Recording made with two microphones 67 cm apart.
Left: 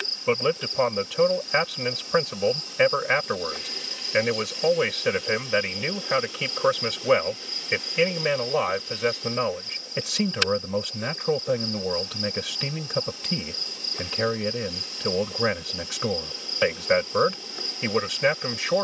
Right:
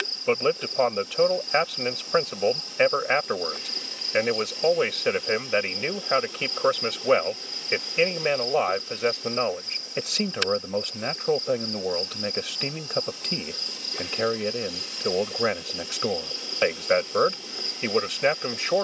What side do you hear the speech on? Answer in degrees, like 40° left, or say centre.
30° left.